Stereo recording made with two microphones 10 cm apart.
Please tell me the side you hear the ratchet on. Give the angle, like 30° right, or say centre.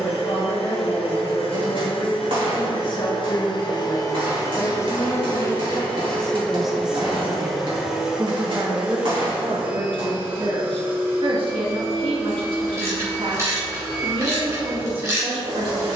30° right.